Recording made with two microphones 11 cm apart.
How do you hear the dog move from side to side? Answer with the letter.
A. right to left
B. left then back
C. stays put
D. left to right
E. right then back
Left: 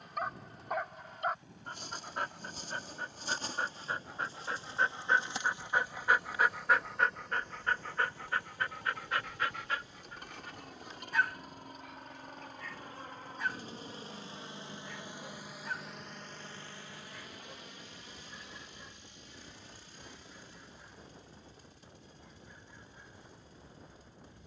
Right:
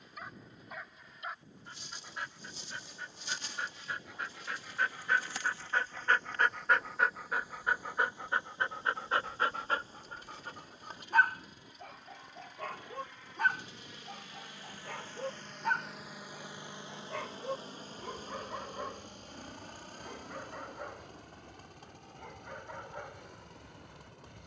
D.